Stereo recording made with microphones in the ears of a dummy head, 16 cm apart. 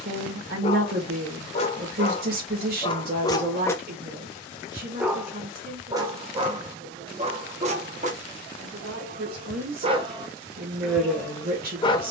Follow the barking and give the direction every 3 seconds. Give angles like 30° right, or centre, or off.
30° left, 10° left, 30° right, 10° right.